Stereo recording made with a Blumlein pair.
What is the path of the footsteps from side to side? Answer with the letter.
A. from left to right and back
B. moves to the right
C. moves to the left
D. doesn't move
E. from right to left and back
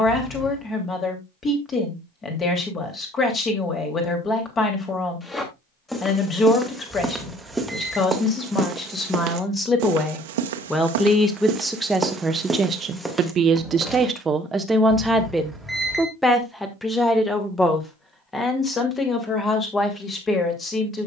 A.